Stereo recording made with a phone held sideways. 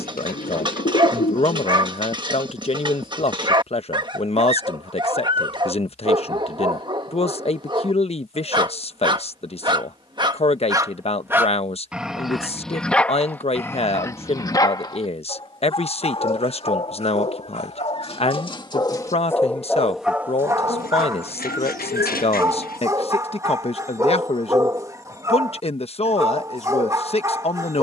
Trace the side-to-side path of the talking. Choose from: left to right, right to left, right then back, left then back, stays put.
stays put.